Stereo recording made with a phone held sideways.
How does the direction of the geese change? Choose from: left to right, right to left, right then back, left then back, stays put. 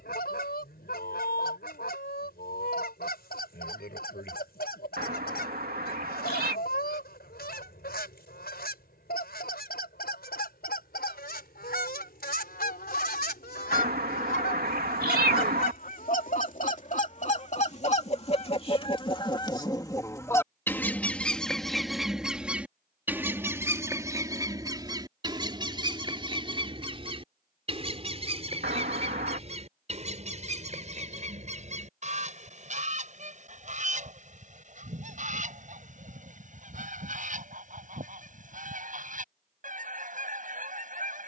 left to right.